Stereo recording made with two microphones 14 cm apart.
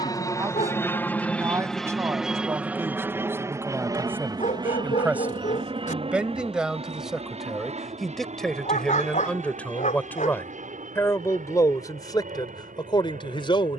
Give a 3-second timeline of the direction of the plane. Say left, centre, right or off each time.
centre, right, right, right, right.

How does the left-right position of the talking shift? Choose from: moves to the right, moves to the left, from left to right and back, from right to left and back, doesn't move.
moves to the left.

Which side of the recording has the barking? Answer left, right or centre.
left.